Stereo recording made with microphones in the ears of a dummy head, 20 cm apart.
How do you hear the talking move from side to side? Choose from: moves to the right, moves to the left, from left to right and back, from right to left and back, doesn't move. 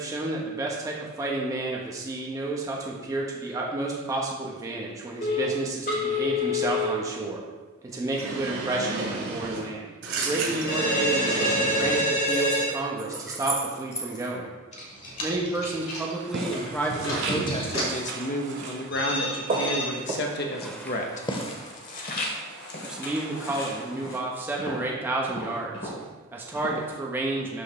from right to left and back.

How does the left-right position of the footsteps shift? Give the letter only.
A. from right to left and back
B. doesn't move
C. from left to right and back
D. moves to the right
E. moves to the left
E.